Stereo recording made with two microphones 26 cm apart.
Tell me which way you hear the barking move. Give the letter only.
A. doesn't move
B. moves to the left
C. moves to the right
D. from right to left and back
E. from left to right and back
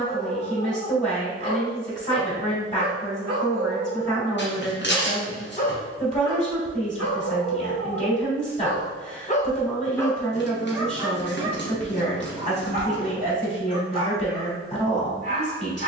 D.